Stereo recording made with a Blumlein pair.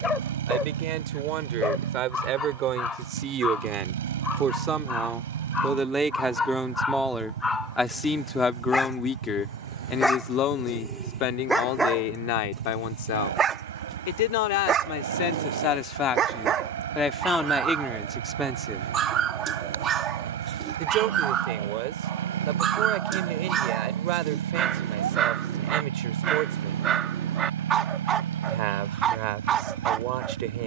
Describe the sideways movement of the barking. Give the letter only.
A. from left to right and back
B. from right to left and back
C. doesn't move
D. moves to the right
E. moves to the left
D.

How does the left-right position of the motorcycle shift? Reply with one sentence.
In this clip you hear the motorcycle stay in one place.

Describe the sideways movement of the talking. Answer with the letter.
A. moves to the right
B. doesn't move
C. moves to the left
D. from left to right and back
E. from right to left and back
E.